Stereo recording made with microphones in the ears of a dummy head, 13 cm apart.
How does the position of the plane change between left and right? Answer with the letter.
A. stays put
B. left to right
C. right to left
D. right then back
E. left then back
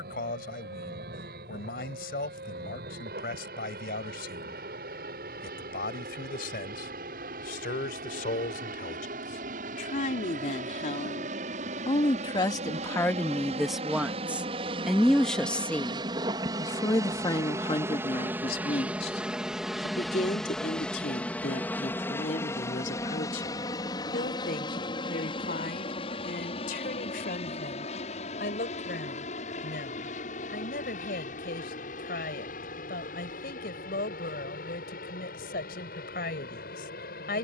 C.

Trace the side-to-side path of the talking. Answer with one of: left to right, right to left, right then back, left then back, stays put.
right then back.